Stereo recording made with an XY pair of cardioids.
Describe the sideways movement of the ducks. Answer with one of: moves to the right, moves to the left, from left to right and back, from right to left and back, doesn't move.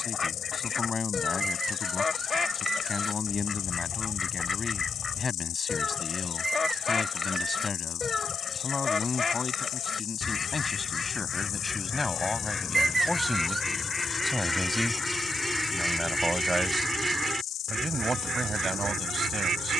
moves to the right.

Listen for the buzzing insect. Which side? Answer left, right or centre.
left.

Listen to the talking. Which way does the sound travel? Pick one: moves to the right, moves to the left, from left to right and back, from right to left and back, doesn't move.
moves to the right.